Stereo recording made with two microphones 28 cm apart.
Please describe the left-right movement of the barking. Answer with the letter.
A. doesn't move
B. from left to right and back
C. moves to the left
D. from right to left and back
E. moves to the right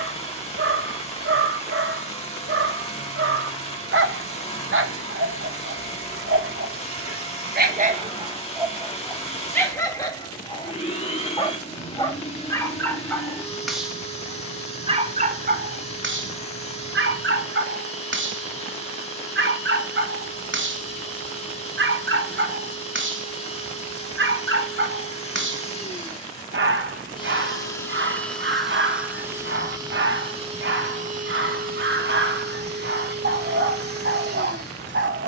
D.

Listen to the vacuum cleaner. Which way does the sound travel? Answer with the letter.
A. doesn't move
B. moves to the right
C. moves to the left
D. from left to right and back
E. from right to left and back
B.